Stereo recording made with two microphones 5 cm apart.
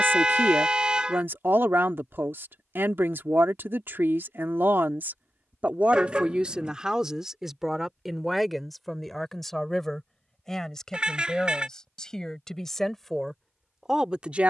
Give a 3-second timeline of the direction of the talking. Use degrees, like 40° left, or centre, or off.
50° right, 40° right, 10° right, 10° left, centre.